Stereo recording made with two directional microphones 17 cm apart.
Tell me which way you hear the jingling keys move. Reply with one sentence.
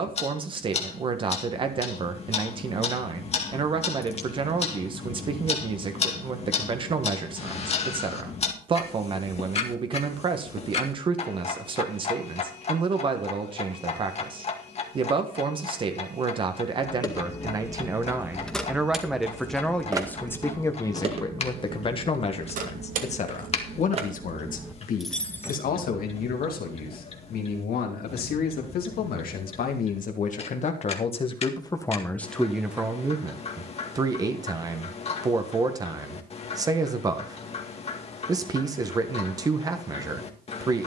In this clip you hear the jingling keys go right and come back.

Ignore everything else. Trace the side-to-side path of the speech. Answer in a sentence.
You can hear the speech move from right to left and back again.